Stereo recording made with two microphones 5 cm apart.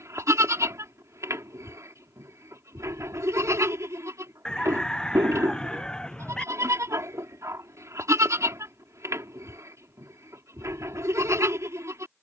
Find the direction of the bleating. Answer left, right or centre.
right.